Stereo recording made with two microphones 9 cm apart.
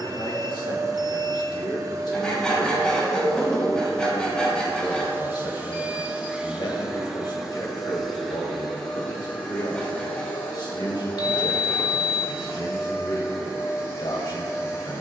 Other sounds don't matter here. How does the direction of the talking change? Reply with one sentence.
You can hear the talking stay in one place.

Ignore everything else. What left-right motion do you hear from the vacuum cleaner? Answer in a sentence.
You can hear the vacuum cleaner travel towards the left.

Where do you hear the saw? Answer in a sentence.
You can hear the saw in the centre.